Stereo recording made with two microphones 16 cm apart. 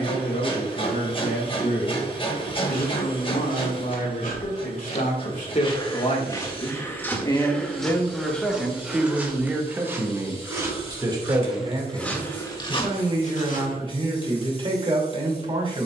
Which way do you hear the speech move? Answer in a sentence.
In this clip you hear the speech move from left to right.